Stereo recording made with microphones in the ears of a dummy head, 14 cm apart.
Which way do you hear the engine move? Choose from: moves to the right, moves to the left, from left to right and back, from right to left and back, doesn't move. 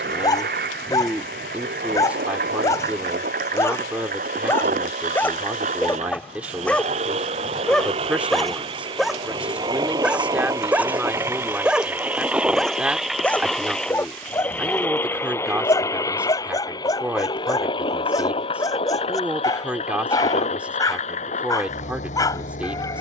moves to the left.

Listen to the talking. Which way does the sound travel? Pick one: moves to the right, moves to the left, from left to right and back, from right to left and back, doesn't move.
doesn't move.